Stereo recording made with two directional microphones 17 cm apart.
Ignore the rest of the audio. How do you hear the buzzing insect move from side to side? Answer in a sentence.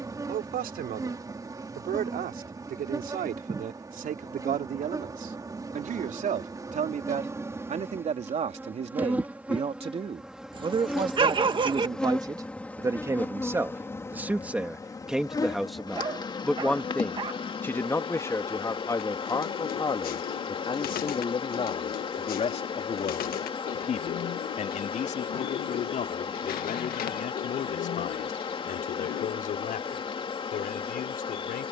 You can hear the buzzing insect move to the left.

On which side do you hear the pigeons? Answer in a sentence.
You can hear the pigeons on the left.